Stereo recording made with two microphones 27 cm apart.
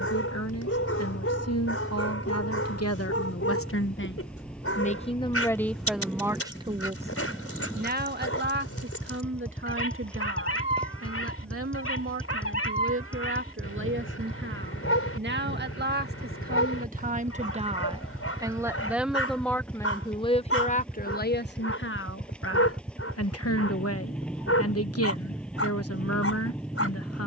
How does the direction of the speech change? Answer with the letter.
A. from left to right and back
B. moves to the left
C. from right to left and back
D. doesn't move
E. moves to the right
A.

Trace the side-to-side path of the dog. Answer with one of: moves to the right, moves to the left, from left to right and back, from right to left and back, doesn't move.
doesn't move.